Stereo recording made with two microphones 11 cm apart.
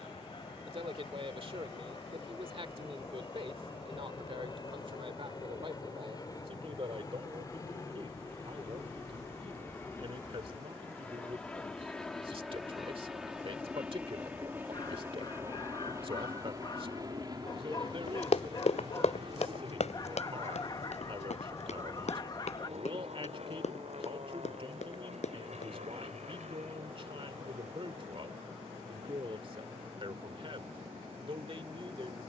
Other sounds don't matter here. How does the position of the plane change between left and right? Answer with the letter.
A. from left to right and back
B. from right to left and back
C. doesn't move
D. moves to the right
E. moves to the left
D.